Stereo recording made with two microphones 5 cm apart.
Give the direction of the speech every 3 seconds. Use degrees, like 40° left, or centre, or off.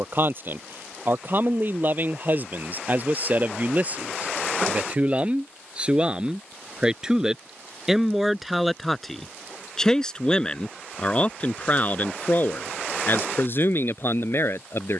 40° right, 30° right, 10° right, 20° left, 40° left.